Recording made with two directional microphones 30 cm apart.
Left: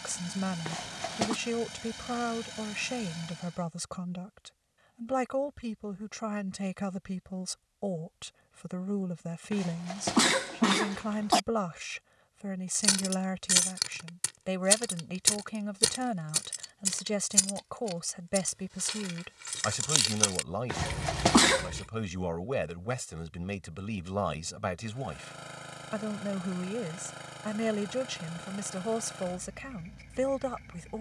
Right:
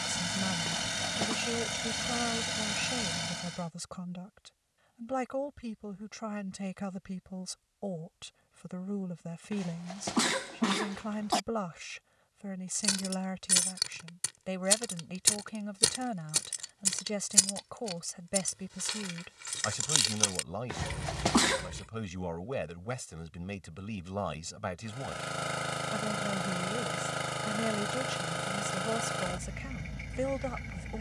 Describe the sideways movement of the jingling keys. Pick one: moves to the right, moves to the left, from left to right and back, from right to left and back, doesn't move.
from left to right and back.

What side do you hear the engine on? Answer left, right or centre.
right.